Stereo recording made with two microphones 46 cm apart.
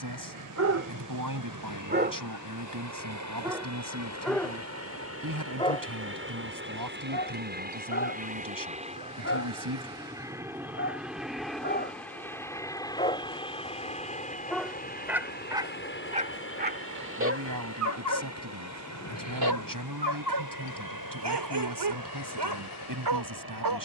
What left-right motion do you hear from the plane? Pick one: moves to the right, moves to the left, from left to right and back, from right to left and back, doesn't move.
moves to the left.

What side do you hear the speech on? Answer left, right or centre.
right.